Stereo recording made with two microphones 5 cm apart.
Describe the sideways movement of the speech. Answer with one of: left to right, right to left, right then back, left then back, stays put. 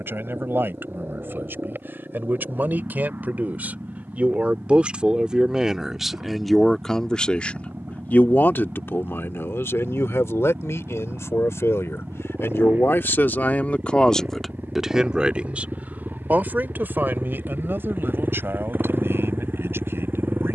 left then back.